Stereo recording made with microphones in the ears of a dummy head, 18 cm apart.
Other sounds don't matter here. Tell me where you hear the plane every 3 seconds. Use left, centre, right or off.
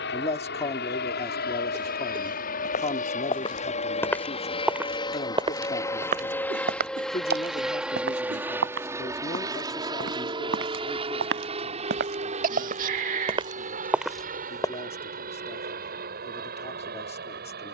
left, left, centre, right, right, right.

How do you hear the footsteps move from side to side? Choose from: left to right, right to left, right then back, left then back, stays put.
right then back.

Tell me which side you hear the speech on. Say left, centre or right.
left.